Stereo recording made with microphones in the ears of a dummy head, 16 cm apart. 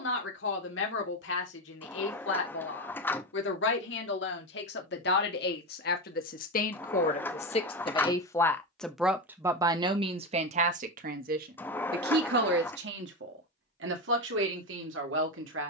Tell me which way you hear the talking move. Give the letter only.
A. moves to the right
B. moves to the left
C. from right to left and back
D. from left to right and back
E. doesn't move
A.